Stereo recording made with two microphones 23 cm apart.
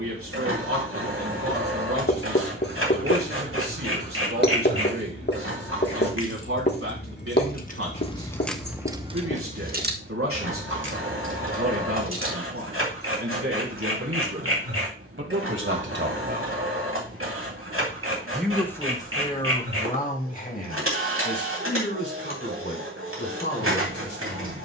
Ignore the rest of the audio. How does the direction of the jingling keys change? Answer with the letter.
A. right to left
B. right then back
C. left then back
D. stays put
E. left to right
E.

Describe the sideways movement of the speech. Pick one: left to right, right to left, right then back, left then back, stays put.
right to left.